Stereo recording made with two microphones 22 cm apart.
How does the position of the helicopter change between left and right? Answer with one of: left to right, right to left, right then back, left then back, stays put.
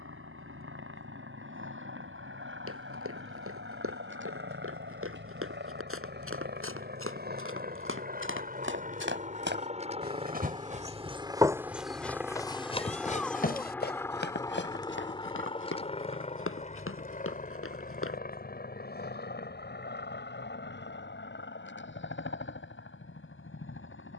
right to left.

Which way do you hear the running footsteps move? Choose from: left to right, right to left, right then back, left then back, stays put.
right to left.